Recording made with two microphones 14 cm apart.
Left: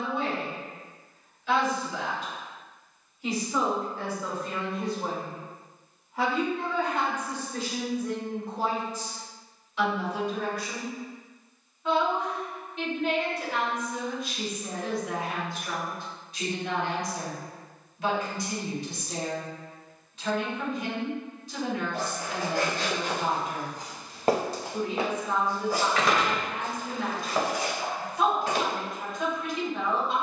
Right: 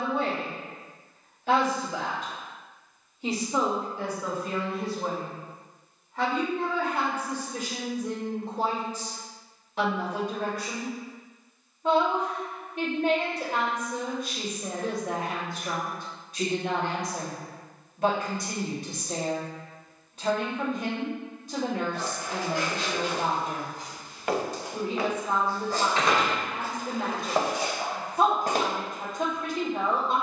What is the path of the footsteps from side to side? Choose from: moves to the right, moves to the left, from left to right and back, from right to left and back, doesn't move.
moves to the right.